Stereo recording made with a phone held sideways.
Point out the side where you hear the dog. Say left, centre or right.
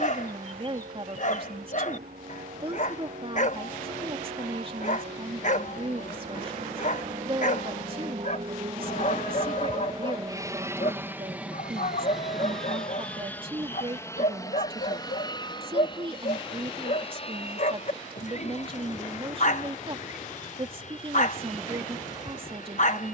left.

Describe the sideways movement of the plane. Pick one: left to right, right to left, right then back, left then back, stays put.
right to left.